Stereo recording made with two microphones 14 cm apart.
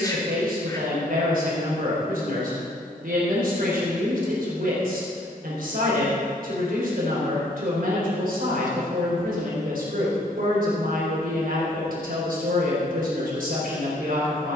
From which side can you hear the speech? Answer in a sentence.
You can hear the speech on the right.